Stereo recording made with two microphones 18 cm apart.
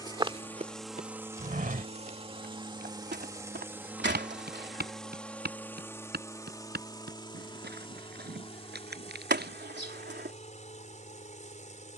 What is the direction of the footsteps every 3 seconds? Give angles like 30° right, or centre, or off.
50° right, 70° right, 70° right, 70° right.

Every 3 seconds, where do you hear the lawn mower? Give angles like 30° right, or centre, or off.
10° right, centre, 30° left, 40° left.